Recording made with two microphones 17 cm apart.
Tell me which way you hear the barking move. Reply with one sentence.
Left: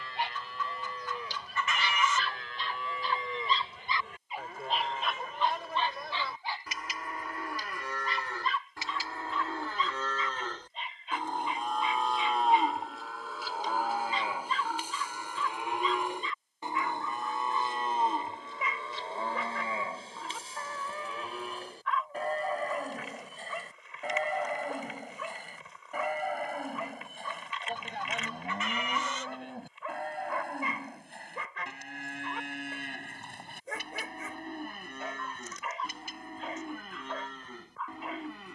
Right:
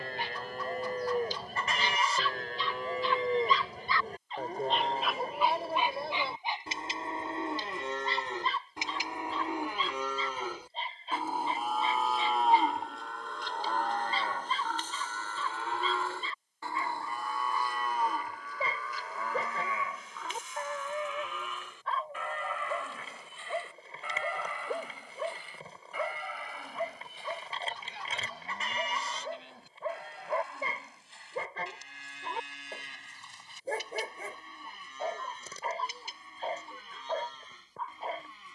In this clip you hear the barking travel towards the right.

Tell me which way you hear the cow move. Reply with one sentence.
In this clip you hear the cow travel towards the left.